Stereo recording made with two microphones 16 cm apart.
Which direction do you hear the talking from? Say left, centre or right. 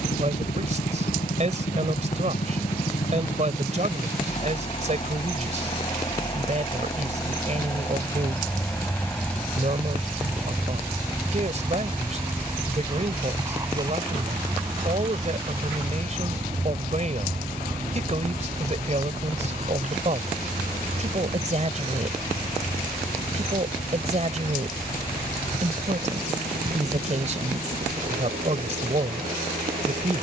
right.